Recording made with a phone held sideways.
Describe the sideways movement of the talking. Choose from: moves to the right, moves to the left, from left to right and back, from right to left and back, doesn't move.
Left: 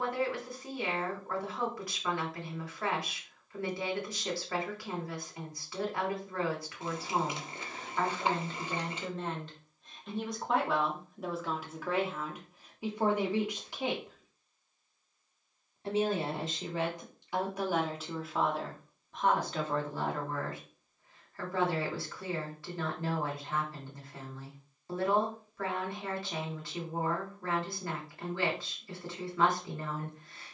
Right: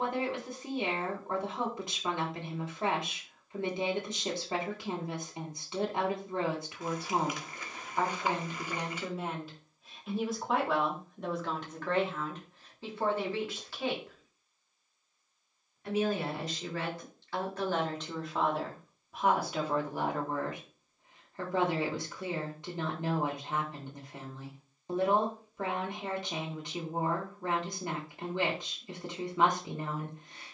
from right to left and back.